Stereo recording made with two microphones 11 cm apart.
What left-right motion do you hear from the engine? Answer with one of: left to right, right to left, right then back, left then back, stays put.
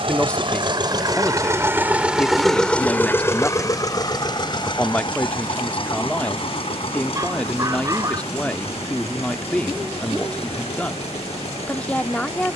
right to left.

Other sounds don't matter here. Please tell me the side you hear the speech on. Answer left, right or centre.
centre.